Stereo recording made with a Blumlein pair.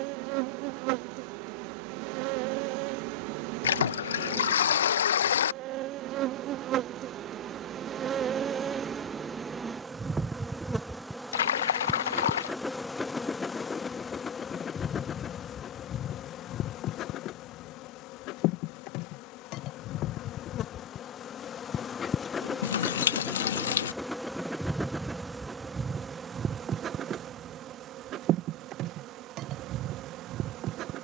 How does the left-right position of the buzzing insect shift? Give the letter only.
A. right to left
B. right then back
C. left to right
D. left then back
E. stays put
D.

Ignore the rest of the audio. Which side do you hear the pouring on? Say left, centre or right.
left.